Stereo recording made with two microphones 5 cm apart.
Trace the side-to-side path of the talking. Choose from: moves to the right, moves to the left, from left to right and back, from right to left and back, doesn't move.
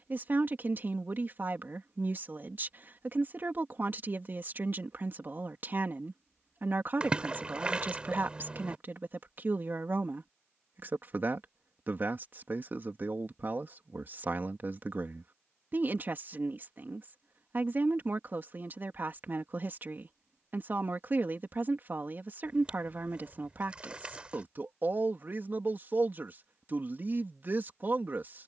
doesn't move.